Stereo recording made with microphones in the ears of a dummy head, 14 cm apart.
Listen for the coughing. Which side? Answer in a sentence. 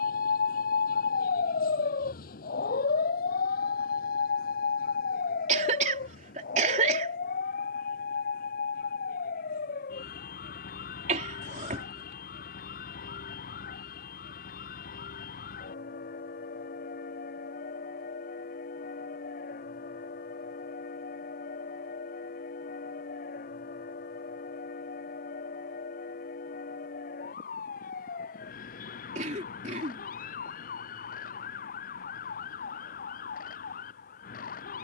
In this clip you hear the coughing on the right.